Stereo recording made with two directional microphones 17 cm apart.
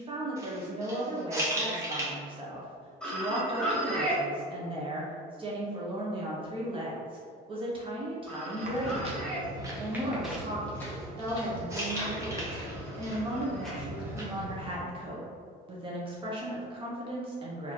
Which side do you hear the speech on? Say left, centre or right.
right.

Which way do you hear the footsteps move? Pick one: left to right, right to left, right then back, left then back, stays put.
left then back.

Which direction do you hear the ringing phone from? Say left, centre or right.
centre.